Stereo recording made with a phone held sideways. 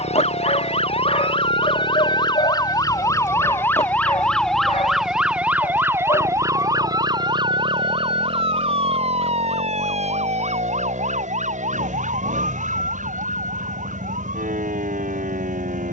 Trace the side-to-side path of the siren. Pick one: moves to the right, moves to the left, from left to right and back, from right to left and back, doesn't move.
moves to the right.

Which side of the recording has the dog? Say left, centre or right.
left.